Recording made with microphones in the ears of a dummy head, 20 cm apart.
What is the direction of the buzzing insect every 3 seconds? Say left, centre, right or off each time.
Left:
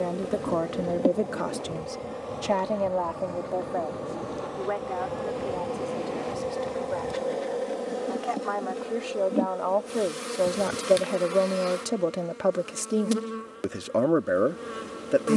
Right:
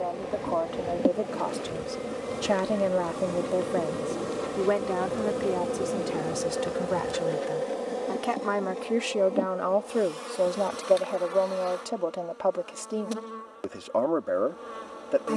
centre, right, centre, left, left.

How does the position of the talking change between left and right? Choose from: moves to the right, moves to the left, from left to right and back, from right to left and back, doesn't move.
from left to right and back.